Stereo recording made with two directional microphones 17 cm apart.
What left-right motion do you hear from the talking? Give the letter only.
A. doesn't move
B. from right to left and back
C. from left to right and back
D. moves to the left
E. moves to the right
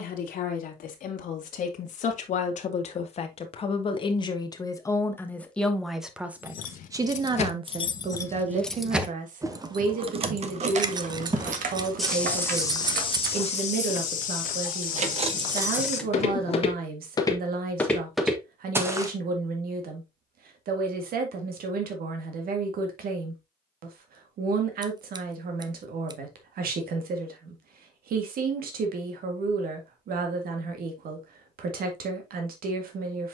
E.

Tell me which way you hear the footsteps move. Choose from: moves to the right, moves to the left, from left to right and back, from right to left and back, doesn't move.
from right to left and back.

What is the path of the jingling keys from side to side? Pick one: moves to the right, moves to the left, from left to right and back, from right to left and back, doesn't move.
from left to right and back.